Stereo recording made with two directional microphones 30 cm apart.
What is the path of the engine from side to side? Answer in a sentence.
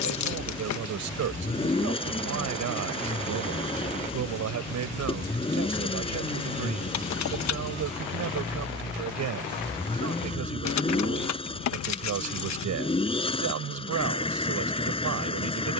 You can hear the engine stay put.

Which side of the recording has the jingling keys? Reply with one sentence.
You can hear the jingling keys on the left.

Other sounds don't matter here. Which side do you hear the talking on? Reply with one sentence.
In this clip you hear the talking on the right.